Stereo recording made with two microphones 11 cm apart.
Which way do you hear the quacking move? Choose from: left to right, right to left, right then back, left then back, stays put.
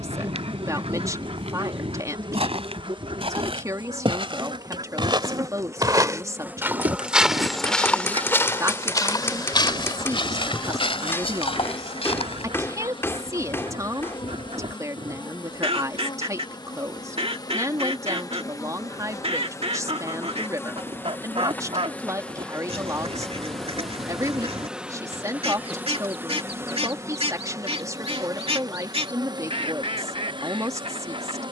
stays put.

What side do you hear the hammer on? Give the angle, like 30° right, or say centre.
20° left.